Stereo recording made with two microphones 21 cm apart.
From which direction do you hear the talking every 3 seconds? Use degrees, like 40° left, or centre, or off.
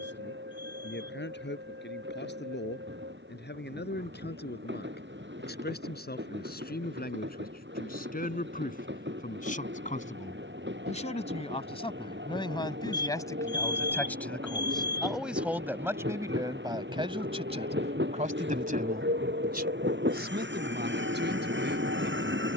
60° left, 50° left, 50° left, 30° left, 10° left, 20° right, 50° right, 60° right.